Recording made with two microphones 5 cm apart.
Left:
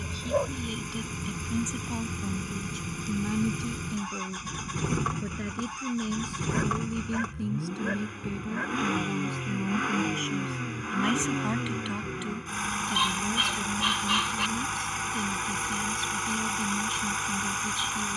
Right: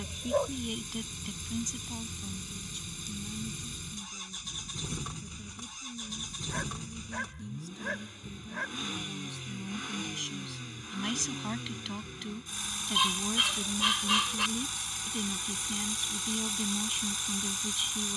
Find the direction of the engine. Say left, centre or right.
left.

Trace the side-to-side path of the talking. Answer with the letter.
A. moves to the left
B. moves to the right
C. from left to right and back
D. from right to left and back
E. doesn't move
D.